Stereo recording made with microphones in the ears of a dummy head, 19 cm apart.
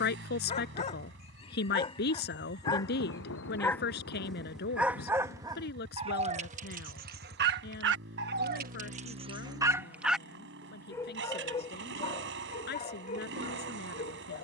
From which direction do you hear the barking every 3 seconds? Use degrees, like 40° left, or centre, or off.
20° left, centre, 40° right, centre, 30° left.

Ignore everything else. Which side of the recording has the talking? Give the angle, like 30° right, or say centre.
50° left.